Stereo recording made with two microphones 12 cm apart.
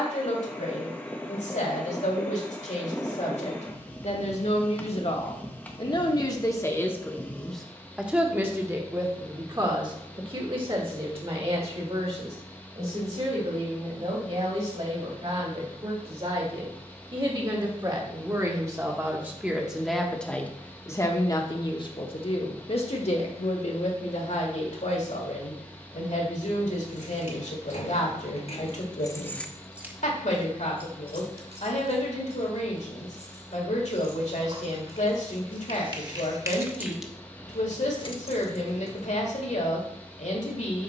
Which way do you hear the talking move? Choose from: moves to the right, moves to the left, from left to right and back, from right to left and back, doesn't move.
from left to right and back.